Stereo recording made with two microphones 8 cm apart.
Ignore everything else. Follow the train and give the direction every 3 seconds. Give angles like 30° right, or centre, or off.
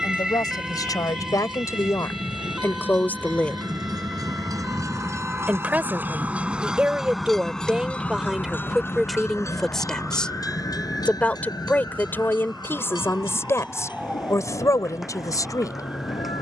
70° right, 40° right, centre, 40° left, 60° left, 70° left.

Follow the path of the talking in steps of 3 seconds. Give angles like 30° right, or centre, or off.
40° left, centre, 10° right, 10° left, 30° left, 40° left.